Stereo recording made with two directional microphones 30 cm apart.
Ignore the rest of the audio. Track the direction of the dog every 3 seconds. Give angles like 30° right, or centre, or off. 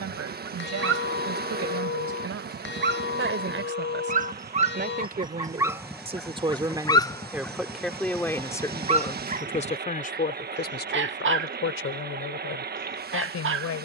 40° right, 20° right, centre, 30° right, 40° right.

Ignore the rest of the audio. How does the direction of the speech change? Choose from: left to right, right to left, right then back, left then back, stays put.
right to left.